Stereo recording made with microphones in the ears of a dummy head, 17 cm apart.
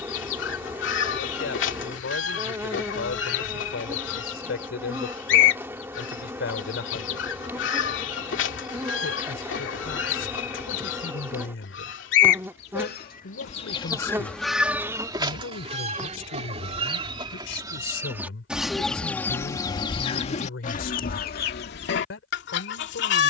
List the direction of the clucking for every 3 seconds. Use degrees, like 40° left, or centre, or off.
70° left, 70° left, 70° left, 70° left, 30° left, 30° right, 20° left, 60° left.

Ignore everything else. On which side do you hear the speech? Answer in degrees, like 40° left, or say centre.
70° left.